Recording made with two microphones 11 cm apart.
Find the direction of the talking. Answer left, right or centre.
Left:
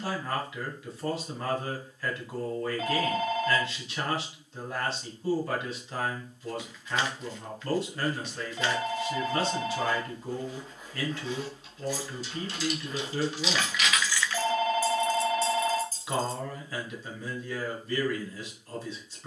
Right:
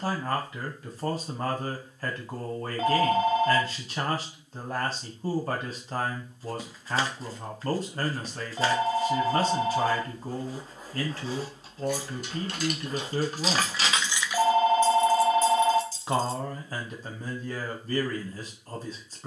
right.